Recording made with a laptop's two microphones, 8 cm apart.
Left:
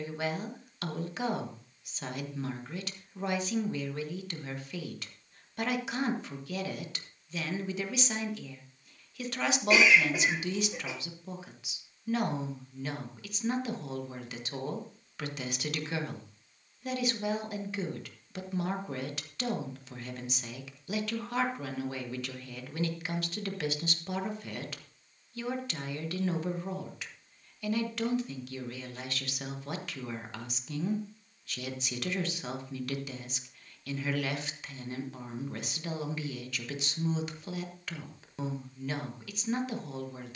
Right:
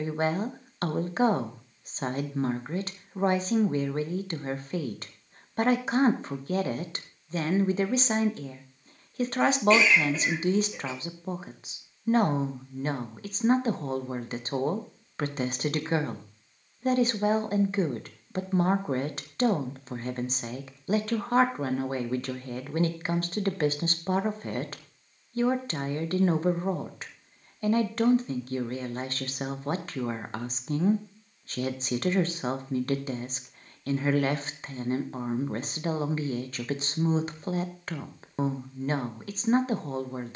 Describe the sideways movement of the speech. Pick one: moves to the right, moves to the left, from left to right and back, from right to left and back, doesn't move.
doesn't move.